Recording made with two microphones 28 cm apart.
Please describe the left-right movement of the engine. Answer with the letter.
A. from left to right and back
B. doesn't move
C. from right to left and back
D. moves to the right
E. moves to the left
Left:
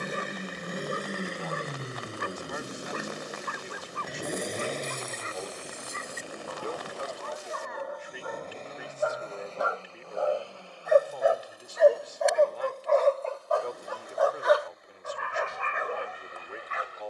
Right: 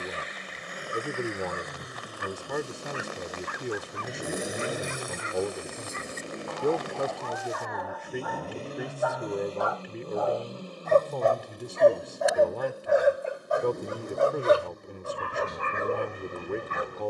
D.